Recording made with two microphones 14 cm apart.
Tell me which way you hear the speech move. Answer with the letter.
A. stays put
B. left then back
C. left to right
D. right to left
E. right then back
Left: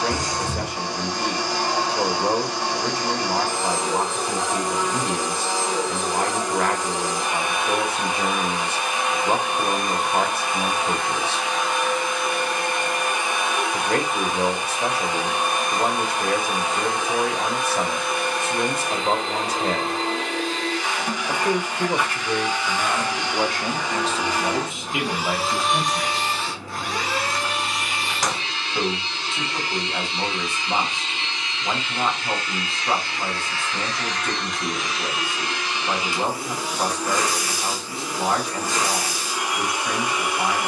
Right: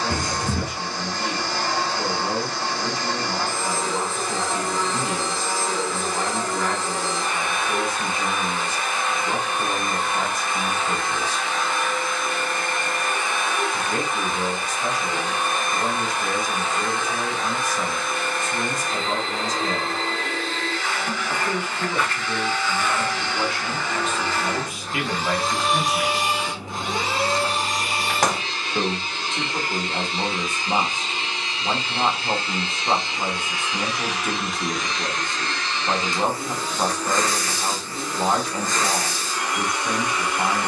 C.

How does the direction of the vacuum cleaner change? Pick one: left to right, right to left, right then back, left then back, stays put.
right then back.